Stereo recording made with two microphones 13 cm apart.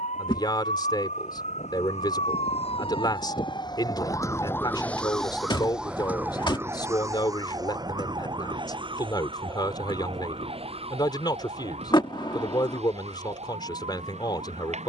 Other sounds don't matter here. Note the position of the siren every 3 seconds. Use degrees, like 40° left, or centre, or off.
60° left, 20° left, 30° right, 50° right, 50° right.